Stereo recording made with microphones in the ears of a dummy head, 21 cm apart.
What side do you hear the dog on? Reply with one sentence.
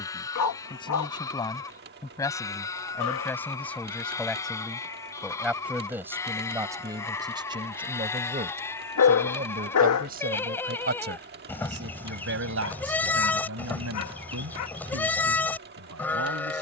In this clip you hear the dog on the left.